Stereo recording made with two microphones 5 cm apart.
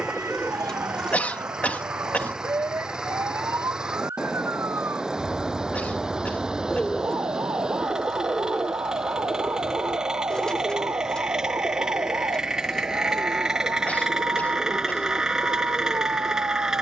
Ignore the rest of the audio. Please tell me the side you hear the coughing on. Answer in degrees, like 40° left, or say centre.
30° left.